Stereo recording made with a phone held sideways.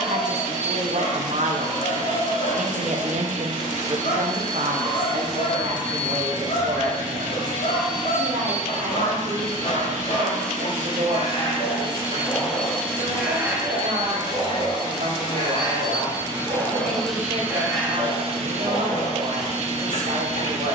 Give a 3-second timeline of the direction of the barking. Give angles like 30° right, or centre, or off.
60° left, 60° left, 60° left, 50° left, 10° right, 20° right, 40° left.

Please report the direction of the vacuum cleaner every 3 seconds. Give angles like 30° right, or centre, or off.
60° right, 60° right, 60° right, 60° right, 20° left, 10° left, 50° right.